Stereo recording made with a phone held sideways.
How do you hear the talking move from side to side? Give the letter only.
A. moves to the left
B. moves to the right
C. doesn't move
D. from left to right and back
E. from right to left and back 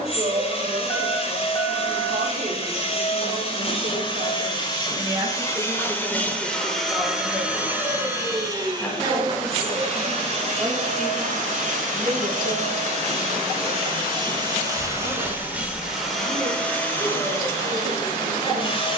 E.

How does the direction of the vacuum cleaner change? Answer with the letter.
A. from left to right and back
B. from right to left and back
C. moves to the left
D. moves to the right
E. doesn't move
A.